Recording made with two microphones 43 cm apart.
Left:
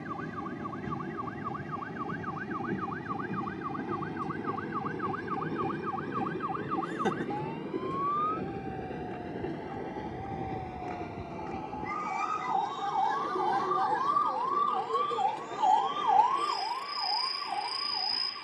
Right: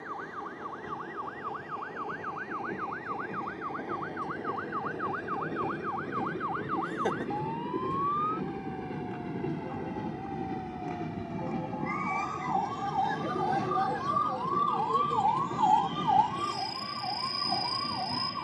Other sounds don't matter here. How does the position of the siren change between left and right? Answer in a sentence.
You can hear the siren go from the left side to the right.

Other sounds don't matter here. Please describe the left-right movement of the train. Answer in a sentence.
You can hear the train move from left to right.